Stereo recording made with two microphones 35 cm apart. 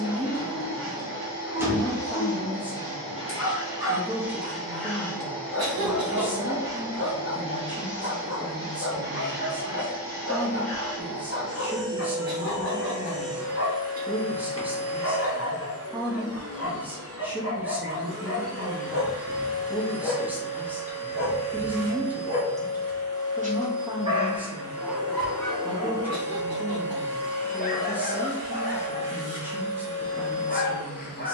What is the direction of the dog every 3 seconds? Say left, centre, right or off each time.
left, left, left, left, left, left, left, right, centre, left, left.